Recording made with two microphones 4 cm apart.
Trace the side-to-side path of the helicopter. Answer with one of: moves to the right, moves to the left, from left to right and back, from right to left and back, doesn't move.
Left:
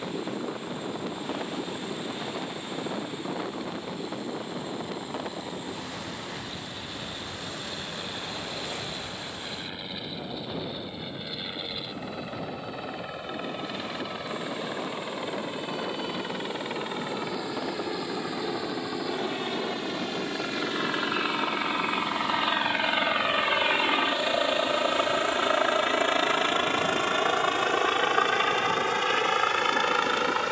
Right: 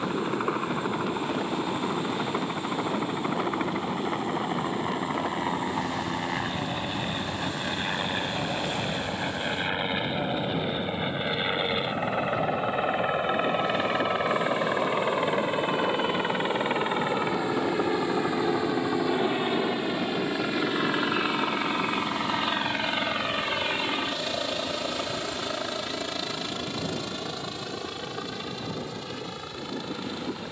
moves to the left.